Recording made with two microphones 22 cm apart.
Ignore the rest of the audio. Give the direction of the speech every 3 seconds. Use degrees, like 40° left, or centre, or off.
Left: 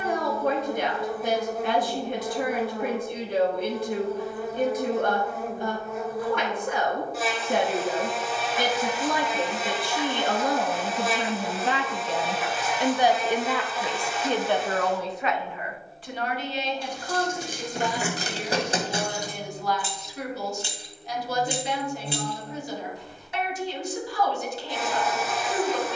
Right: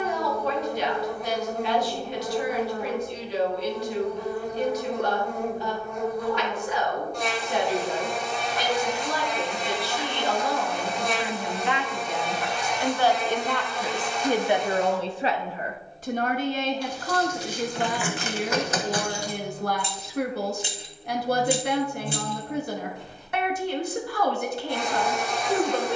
50° left, 50° left, 50° left, 50° left, centre, 50° right, 60° right, 60° right, 60° right.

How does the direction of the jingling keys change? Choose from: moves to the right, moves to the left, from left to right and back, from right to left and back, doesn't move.
moves to the right.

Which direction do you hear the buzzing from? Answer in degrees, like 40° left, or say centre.
centre.